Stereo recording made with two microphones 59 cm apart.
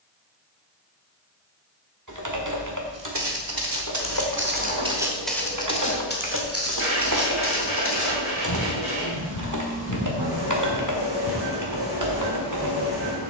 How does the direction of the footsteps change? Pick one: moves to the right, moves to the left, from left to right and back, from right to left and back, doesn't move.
from right to left and back.